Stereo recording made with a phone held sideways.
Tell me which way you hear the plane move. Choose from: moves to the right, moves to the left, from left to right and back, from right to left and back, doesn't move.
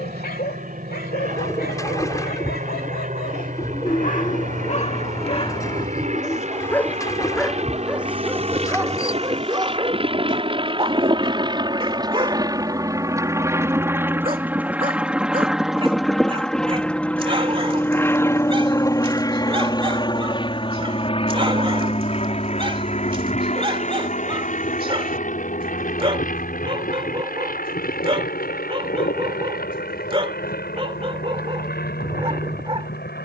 moves to the left.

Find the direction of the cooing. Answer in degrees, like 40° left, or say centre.
20° left.